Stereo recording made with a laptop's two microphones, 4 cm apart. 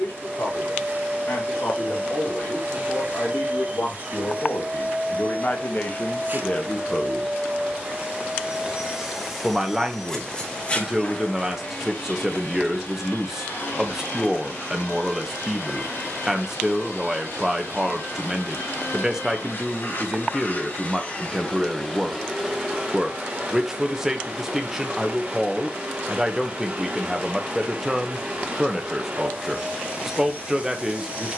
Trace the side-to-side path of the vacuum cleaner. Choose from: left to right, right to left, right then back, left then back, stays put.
left then back.